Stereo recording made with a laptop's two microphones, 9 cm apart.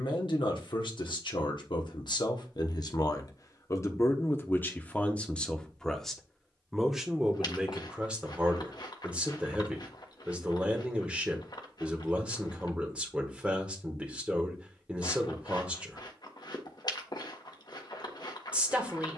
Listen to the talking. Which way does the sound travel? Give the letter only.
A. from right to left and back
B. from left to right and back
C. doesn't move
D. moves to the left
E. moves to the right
E.